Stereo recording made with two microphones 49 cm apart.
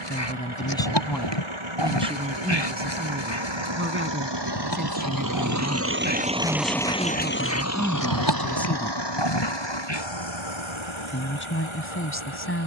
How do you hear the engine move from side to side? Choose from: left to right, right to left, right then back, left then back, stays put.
right to left.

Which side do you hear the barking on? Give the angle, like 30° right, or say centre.
60° left.